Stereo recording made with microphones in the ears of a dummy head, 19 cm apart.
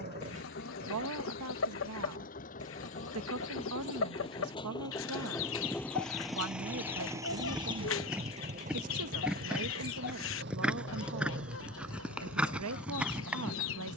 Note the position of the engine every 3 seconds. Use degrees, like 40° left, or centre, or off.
50° left, 20° left, 20° right, 60° right, 70° right.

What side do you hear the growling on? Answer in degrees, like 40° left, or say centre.
40° right.